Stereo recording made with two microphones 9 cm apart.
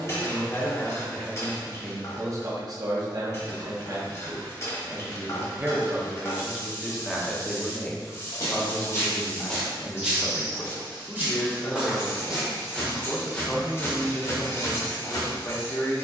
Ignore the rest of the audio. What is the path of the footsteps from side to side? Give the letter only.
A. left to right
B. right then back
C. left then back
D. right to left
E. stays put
B.